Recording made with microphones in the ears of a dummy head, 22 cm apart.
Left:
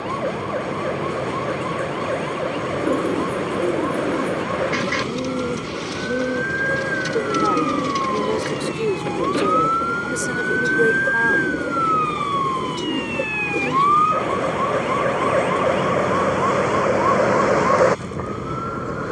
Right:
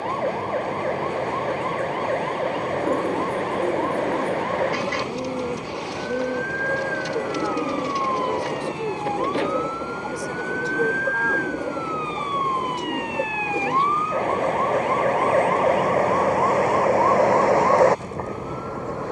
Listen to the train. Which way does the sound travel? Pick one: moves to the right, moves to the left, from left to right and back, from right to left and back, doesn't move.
doesn't move.